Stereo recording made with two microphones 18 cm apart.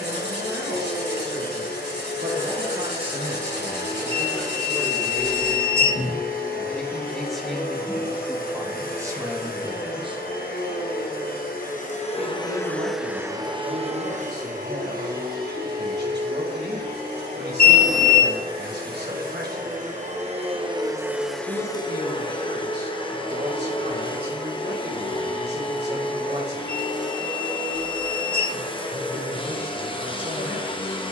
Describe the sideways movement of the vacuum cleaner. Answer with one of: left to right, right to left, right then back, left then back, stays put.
right then back.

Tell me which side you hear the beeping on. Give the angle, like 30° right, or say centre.
80° left.